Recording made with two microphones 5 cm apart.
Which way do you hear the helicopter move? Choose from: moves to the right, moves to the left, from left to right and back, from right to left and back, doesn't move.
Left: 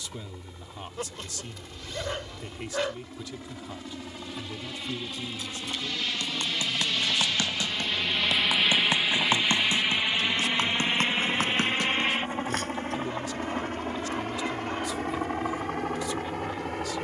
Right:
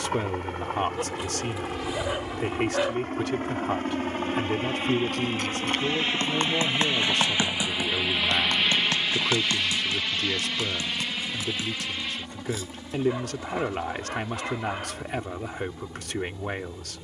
moves to the left.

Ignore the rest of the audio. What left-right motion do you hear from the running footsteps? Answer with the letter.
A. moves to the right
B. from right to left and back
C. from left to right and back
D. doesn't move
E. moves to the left
E.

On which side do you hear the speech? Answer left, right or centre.
right.